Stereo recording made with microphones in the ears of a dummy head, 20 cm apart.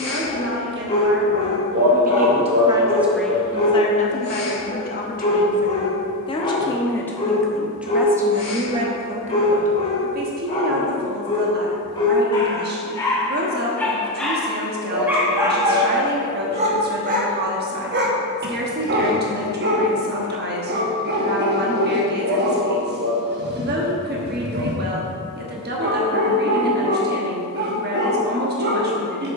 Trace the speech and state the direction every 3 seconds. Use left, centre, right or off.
right, left, centre, right, right, right, right, right, right, right.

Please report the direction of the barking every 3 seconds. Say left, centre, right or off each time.
left, left, left, left, centre, right, right, right, right, right.